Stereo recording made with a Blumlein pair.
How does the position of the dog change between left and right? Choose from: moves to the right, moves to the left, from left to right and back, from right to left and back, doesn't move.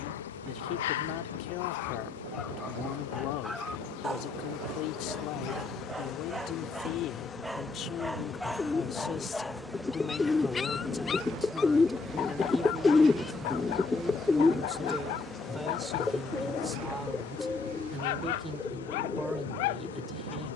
from left to right and back.